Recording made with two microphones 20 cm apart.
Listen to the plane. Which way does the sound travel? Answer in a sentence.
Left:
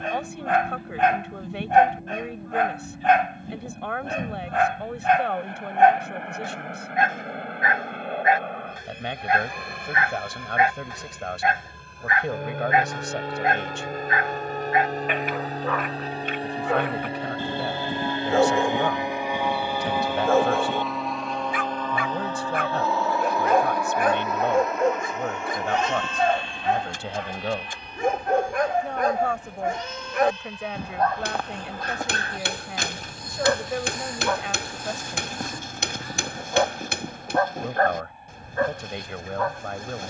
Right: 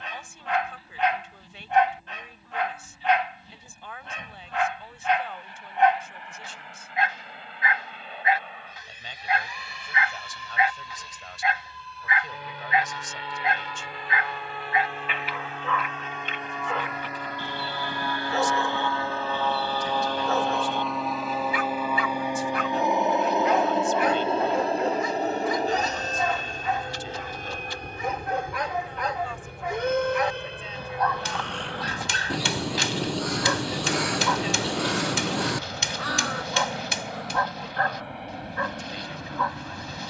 In this clip you hear the plane move to the right.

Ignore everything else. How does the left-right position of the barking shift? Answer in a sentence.
You can hear the barking stay in one place.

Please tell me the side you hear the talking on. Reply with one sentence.
You can hear the talking on the left.